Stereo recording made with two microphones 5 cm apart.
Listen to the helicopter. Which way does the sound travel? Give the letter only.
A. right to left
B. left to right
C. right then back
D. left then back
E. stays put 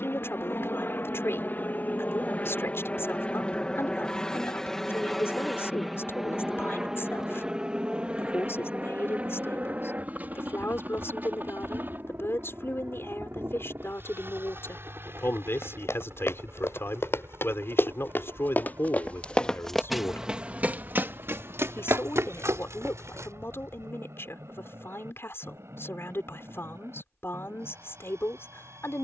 B.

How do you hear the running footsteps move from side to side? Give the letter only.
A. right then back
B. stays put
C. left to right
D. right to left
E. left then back
C.